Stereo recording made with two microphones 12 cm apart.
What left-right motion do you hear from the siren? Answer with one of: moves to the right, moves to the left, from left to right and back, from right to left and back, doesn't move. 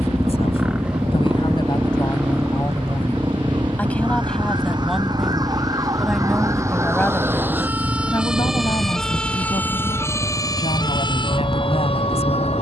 moves to the left.